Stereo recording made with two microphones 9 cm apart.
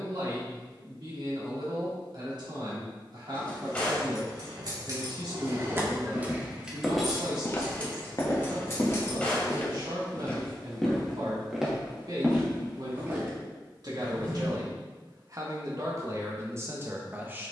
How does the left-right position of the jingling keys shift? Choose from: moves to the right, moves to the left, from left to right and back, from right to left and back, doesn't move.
moves to the left.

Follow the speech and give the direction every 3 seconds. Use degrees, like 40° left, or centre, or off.
60° right, 60° right, 60° right, 60° right, 50° right, 30° right.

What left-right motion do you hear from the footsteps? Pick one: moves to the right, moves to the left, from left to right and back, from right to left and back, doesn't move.
from right to left and back.